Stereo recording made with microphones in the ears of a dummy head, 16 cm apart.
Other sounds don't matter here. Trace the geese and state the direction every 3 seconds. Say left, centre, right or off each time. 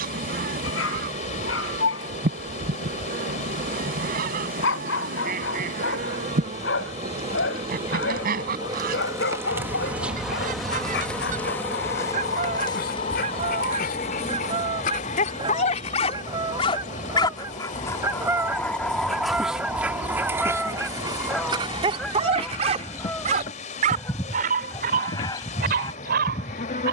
right, right, right, right, right, right, centre, centre, left.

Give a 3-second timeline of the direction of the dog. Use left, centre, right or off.
left, left, left, left, left, left, centre, right, right.